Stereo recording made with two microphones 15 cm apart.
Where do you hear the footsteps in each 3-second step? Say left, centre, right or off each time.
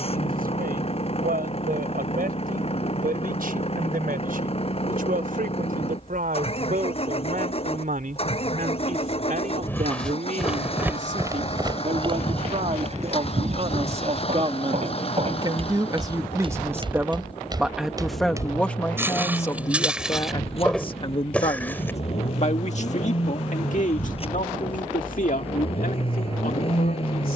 off, off, off, centre, right, right, centre, centre, off.